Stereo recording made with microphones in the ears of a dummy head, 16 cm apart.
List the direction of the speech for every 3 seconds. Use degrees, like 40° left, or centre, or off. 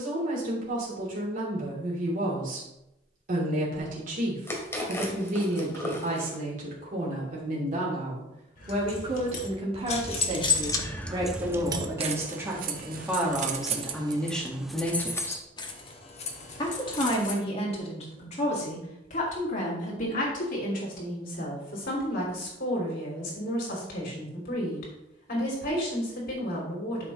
50° right, 50° right, 50° right, 30° right, centre, 30° left, 50° left, 60° left, 60° left.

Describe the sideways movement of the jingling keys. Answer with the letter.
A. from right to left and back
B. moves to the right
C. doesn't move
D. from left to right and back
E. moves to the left
D.